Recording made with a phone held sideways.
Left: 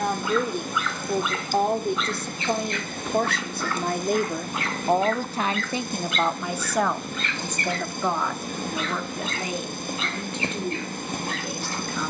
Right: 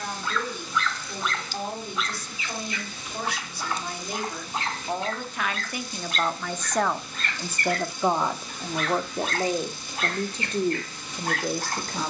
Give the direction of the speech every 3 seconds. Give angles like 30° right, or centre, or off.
60° left, 50° left, 10° right, 40° right.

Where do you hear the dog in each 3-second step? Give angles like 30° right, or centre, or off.
centre, 30° right, 50° right, 60° right.